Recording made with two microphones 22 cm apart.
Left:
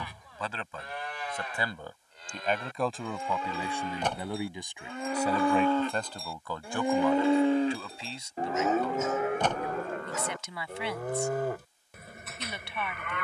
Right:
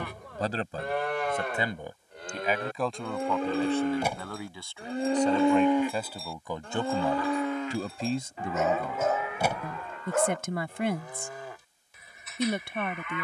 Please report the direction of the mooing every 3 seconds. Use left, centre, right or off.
right, right, left, left, left.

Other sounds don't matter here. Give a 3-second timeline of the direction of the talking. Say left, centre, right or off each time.
right, centre, right, right, right.